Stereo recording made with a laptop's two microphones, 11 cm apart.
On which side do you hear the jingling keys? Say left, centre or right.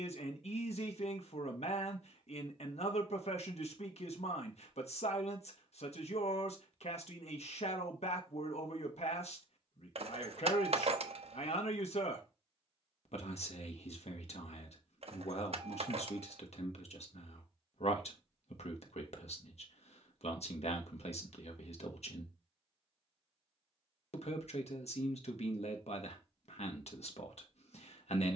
right.